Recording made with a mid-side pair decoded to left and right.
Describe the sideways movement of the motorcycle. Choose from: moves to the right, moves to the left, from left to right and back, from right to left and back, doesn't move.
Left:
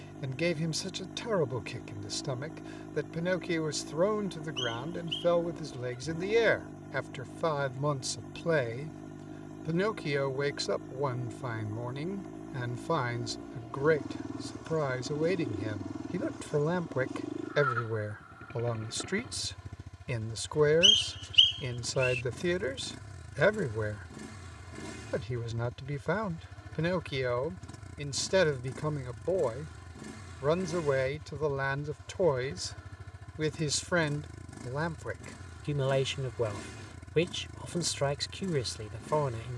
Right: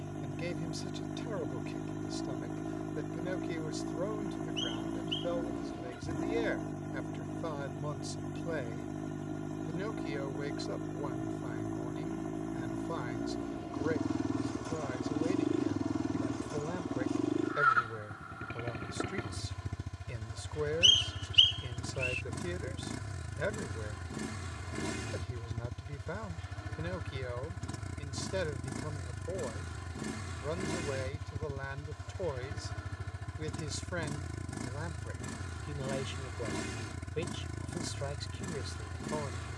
doesn't move.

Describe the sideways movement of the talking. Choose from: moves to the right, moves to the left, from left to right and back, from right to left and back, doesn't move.
doesn't move.